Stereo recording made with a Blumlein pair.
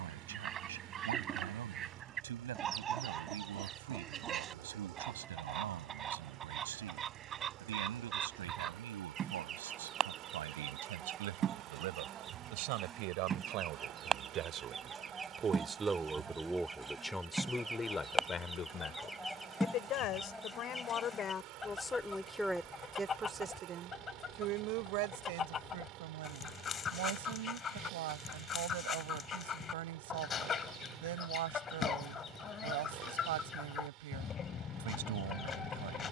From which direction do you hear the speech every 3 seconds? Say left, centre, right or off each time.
right, right, right, right, right, centre, left, centre, right, right, right, right.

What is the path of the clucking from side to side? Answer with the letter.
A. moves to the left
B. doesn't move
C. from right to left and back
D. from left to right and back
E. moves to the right
A.